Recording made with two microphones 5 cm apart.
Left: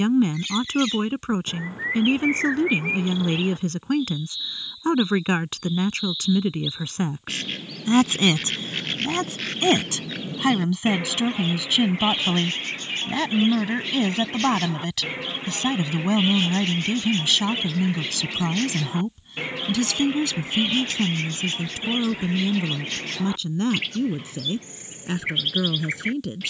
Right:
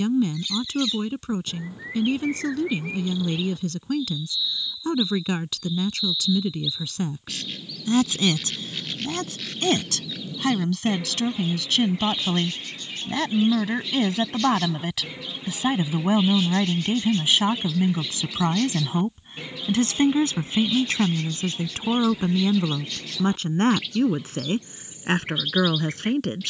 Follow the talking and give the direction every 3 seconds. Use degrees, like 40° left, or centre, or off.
40° left, 40° left, 30° left, 20° left, centre, 20° right, 30° right, 50° right, 50° right.